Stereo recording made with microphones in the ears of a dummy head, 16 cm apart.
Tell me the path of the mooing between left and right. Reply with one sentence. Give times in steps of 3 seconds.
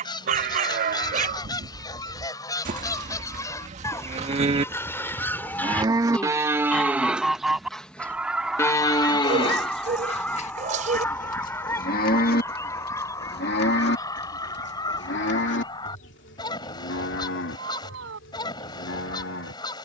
In this clip you hear the mooing on the right from 0 s, in the centre from 6 s and on the left from 9 s.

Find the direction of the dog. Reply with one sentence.
In this clip you hear the dog on the right.